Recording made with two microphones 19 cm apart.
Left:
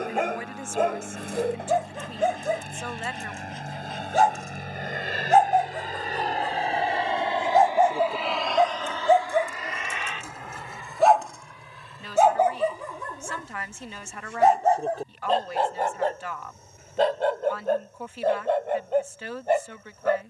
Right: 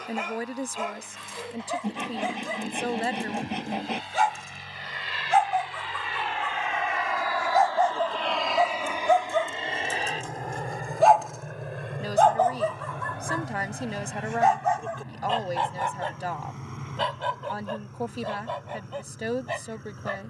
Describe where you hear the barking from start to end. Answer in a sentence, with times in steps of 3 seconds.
You can hear the barking on the left from 0 s, in the centre from 9 s and on the left from 12 s.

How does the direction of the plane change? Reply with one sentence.
You can hear the plane move from left to right.